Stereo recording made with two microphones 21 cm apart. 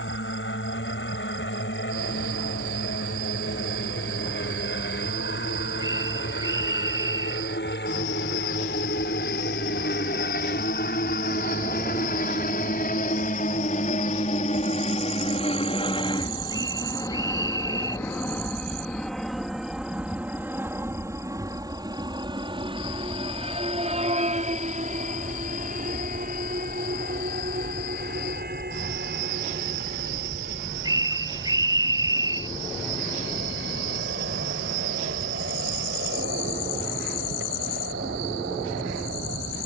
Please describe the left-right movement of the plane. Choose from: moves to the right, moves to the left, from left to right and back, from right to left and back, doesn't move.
moves to the right.